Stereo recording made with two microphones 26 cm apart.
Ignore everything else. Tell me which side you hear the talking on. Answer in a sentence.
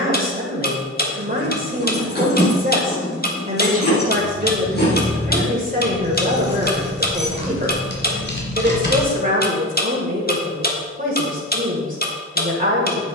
In this clip you hear the talking on the right.